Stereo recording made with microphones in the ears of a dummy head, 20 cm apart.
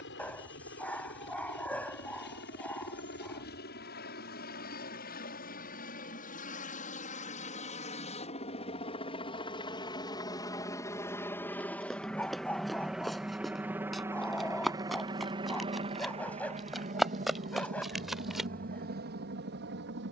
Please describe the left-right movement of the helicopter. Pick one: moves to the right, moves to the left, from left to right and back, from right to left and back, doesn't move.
moves to the right.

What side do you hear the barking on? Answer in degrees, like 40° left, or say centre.
10° left.